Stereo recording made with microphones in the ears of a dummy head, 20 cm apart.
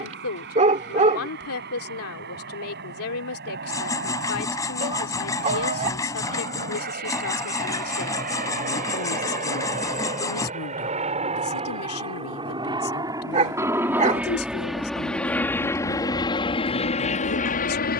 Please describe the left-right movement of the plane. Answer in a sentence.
You can hear the plane move from right to left.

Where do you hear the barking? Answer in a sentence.
In this clip you hear the barking on the right.